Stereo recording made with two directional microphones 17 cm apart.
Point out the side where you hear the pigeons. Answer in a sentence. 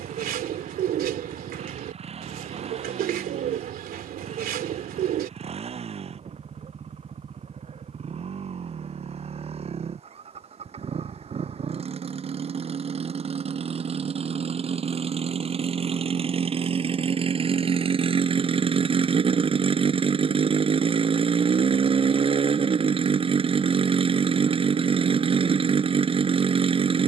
You can hear the pigeons on the right.